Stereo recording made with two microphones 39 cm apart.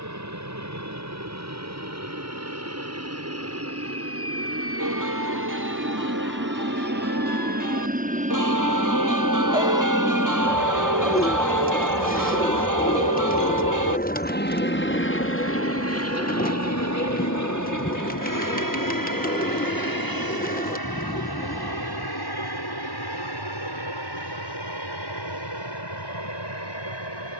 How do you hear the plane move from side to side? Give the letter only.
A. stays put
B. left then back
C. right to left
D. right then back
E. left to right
C.